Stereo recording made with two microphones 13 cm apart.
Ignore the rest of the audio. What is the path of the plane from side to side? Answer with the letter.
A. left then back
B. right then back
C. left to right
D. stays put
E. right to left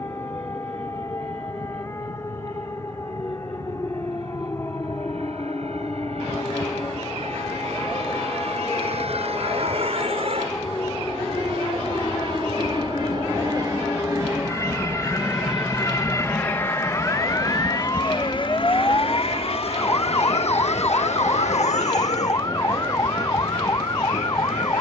E.